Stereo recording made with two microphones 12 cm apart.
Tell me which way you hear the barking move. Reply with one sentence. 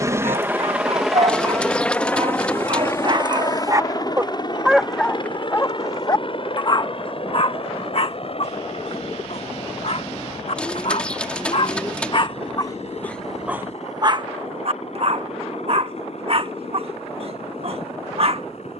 You can hear the barking move from right to left and back again.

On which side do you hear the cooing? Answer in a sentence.
In this clip you hear the cooing in the centre.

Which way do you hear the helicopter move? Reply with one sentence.
In this clip you hear the helicopter move to the left.